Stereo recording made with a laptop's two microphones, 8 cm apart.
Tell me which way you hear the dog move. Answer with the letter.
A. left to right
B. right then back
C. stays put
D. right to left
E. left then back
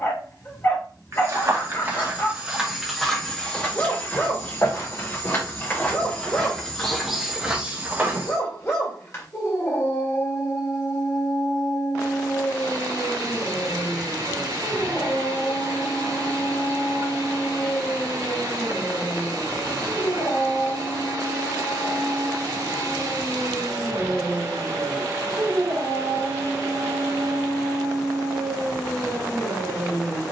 A.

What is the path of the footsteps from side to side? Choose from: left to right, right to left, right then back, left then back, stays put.
left then back.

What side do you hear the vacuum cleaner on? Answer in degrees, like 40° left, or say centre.
70° right.